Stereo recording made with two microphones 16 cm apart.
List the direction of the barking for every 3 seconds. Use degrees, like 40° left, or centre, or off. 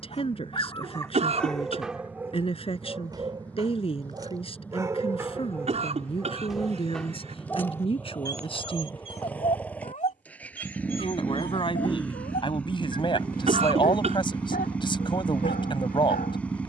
centre, 20° right, 10° left, 50° left, 60° left, 60° left.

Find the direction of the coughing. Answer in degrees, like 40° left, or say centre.
40° right.